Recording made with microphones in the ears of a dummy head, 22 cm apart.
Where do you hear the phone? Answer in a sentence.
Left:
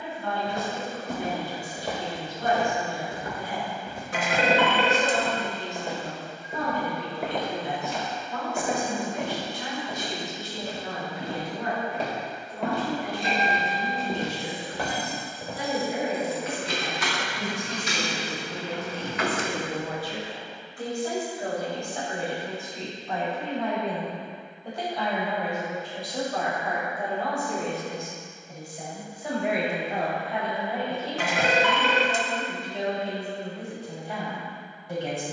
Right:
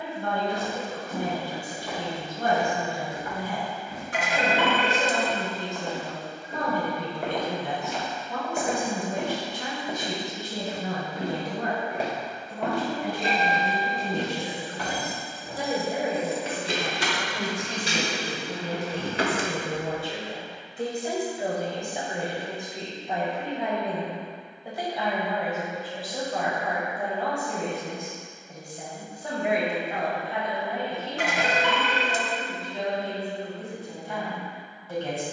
In this clip you hear the phone on the left.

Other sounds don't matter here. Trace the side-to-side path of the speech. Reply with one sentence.
You can hear the speech move to the left.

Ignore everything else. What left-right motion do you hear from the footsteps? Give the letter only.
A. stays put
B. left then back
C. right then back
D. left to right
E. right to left
C.